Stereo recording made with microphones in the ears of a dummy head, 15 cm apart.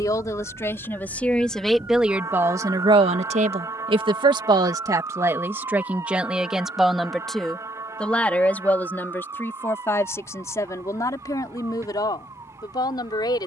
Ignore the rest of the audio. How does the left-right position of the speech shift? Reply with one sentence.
In this clip you hear the speech move from left to right and back again.